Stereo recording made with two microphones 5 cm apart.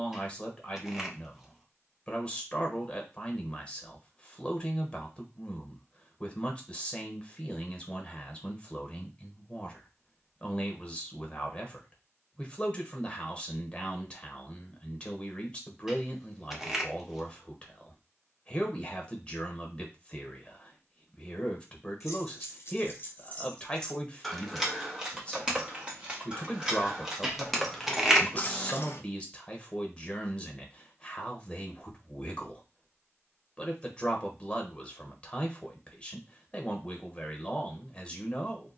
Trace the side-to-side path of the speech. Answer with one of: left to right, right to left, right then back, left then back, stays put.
stays put.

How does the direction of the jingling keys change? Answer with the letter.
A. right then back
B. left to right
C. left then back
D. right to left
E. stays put
A.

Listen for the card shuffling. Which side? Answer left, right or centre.
centre.